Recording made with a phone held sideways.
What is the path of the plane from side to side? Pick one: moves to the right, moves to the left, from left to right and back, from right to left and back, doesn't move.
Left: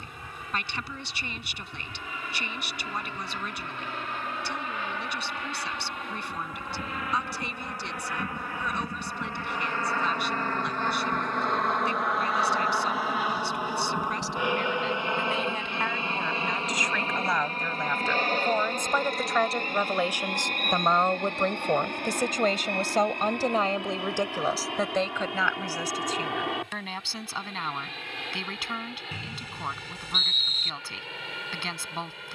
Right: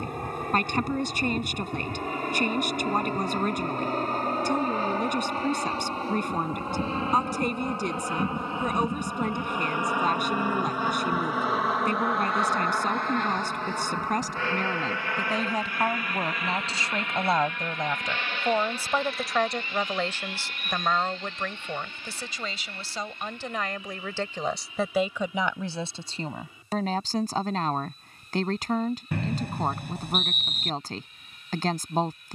moves to the left.